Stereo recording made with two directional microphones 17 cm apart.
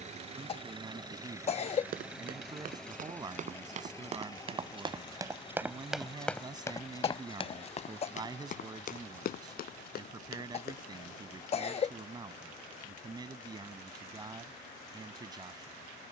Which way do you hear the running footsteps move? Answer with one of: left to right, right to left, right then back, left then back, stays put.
right to left.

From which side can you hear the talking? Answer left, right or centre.
right.